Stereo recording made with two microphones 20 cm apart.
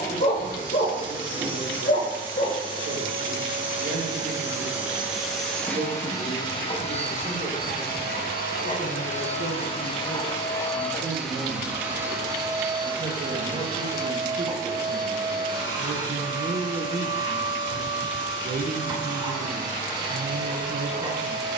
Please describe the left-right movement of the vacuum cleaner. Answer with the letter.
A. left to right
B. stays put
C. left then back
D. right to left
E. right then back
C.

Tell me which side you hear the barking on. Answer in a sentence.
You can hear the barking on the left.